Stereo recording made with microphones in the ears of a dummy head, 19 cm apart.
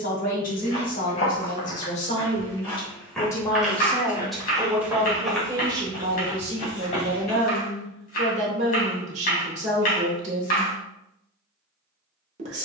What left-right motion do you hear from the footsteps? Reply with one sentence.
You can hear the footsteps move from left to right and back again.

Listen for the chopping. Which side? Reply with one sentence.
You can hear the chopping on the left.